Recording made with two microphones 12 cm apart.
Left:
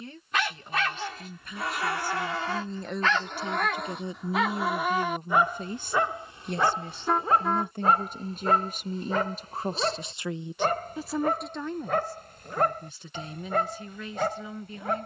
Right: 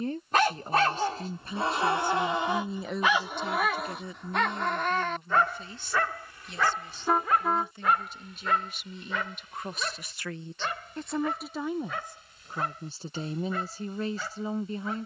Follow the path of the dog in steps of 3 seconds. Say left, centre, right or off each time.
right, centre, left, left, left.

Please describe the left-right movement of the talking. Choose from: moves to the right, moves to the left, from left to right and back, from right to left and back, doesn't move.
from right to left and back.